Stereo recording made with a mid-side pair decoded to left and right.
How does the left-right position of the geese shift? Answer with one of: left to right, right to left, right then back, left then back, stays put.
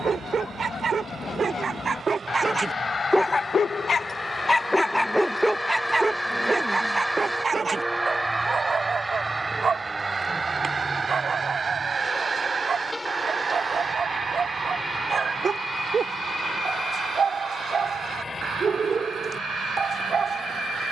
left to right.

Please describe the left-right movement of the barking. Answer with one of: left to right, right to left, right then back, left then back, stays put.
left then back.